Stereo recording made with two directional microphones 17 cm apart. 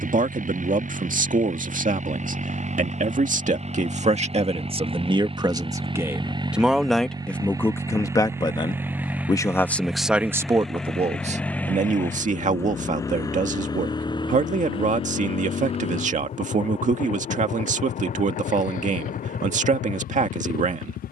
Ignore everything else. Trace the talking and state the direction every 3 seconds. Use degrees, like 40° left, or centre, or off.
50° right, 30° right, 10° left, 10° right, 40° right, 40° right, 40° right.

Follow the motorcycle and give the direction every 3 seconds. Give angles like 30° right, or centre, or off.
50° right, 30° right, 20° right, centre, 20° left, 40° left, 50° left.